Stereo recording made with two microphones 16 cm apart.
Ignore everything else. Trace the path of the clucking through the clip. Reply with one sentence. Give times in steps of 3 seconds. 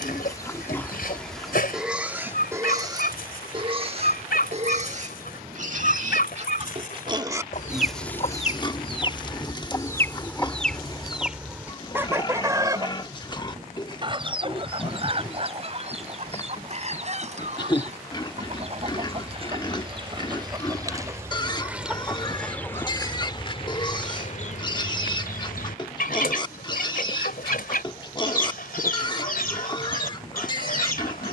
You can hear the clucking on the left from 0 s, in the centre from 9 s, on the right from 12 s, in the centre from 21 s and on the left from 24 s.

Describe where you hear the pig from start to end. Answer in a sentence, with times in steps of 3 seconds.
In this clip you hear the pig in the centre from 0 s, on the right from 3 s, in the centre from 6 s and on the left from 9 s.